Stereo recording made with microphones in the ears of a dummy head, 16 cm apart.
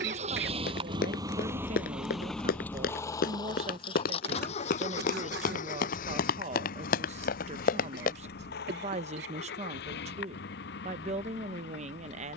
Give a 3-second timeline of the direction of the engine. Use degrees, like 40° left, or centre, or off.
10° right, 40° left, 60° left, 60° left.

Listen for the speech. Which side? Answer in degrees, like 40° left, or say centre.
40° right.